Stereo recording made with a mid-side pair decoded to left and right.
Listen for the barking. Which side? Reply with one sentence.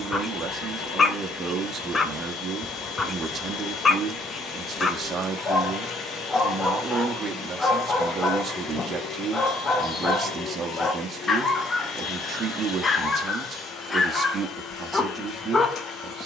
In this clip you hear the barking on the left.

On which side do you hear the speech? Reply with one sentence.
In this clip you hear the speech on the right.